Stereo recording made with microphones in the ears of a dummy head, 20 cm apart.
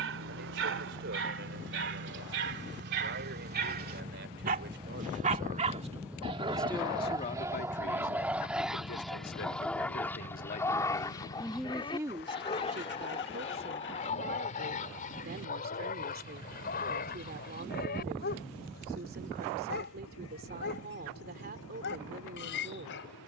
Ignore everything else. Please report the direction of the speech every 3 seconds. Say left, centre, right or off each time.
right, right, left, left, right, right, right, right.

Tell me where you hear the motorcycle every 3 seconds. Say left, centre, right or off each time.
right, right, centre, left, left, left, left, left.